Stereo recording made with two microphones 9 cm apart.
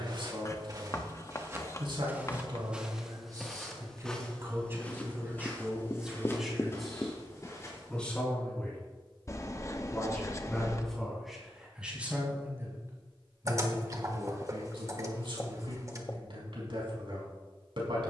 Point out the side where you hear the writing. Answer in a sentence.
You can hear the writing on the left.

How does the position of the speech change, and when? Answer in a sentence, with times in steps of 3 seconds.
You can hear the speech on the right from 0 s, in the centre from 6 s and on the right from 12 s.